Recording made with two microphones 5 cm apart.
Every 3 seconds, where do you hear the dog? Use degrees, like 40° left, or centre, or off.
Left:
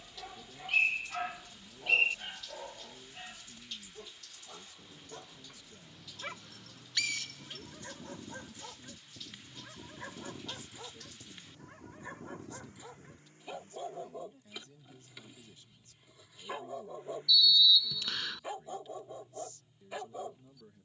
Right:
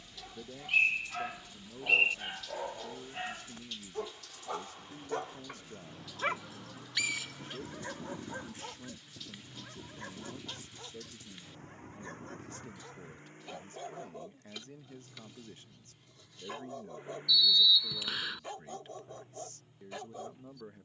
centre, 50° right, 30° right, 10° left, 10° left, 10° left, 10° left.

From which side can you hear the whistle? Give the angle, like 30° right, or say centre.
10° right.